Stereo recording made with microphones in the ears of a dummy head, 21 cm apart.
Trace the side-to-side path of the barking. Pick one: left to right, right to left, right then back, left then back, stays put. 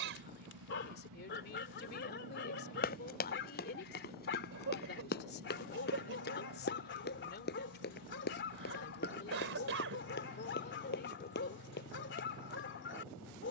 stays put.